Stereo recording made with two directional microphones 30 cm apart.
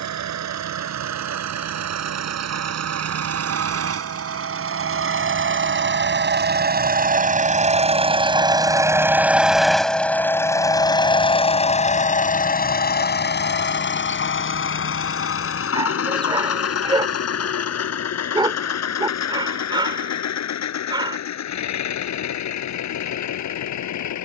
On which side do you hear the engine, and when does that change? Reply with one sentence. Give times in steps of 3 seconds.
You can hear the engine on the right from 0 s, in the centre from 9 s and on the left from 12 s.